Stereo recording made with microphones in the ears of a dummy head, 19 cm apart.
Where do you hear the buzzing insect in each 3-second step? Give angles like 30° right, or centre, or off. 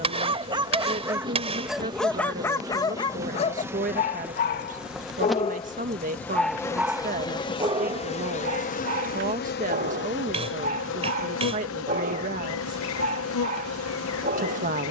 20° right, 10° right, 20° left, 60° left, 70° left.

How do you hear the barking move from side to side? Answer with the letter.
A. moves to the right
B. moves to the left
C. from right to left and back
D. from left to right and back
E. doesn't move
C.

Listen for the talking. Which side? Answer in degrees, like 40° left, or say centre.
40° right.